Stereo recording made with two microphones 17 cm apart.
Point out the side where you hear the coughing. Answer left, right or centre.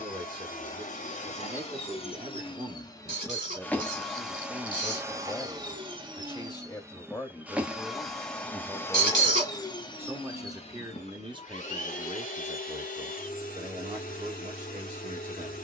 right.